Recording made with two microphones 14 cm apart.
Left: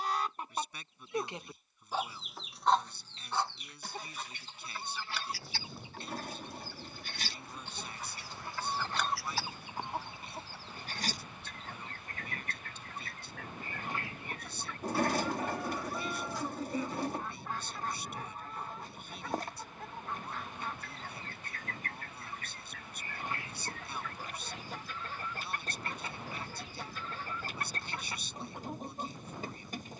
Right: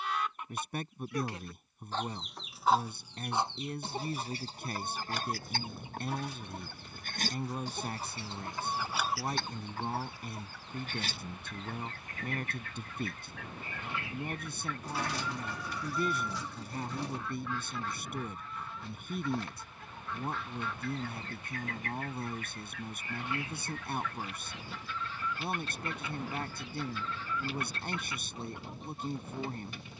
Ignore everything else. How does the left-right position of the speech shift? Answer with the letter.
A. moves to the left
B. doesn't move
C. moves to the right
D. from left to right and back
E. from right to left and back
B.